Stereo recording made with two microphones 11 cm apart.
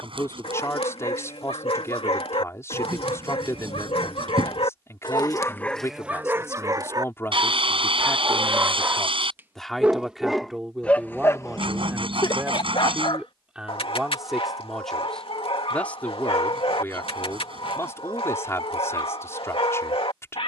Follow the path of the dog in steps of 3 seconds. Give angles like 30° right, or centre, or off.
70° left, 60° left, 30° right, 10° left, 60° left, 70° left, 70° left.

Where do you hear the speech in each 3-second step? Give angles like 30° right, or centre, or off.
30° left, 30° left, 20° left, 10° right, 10° right, 20° left, 30° left.